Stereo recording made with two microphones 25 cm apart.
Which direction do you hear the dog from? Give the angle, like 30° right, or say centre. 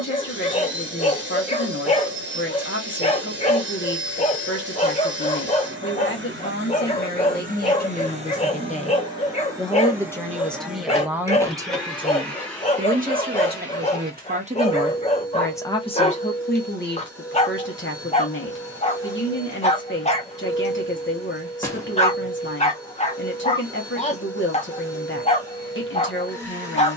30° left.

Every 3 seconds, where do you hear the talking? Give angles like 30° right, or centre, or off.
50° left, 50° left, 40° left, centre, 30° right, 30° left, 50° left, 50° left, 50° left.